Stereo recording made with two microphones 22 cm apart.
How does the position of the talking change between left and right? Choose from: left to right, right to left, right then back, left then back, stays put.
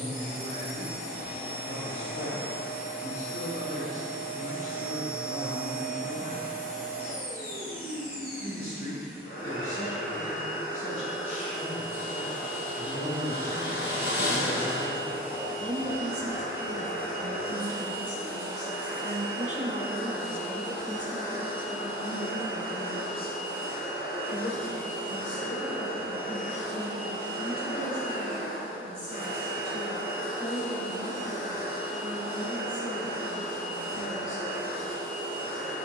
right then back.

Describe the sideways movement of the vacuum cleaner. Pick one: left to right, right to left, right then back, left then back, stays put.
stays put.